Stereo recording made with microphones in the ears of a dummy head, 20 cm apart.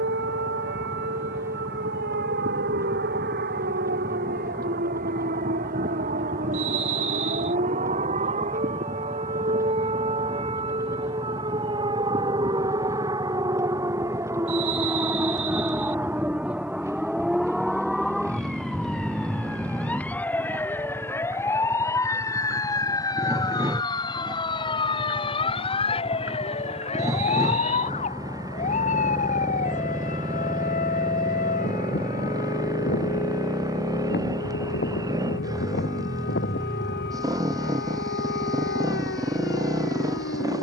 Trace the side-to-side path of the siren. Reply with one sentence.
In this clip you hear the siren move to the left.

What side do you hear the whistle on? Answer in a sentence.
In this clip you hear the whistle on the right.